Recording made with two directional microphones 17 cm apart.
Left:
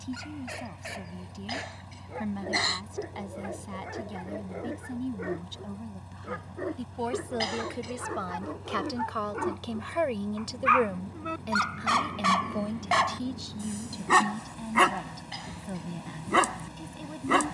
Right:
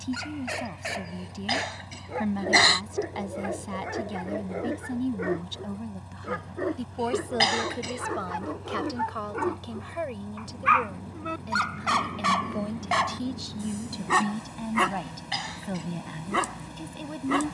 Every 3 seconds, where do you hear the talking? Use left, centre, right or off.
right, right, centre, left, centre, right.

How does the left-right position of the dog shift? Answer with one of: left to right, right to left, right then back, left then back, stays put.
right to left.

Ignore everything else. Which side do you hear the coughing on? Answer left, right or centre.
right.